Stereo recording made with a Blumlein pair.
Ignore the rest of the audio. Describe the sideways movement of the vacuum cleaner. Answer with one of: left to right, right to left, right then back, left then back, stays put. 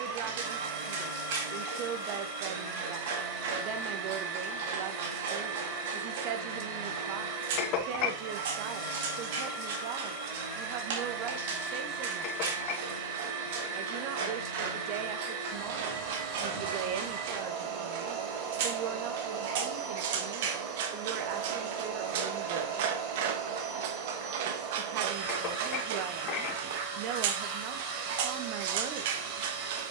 stays put.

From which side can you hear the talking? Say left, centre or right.
right.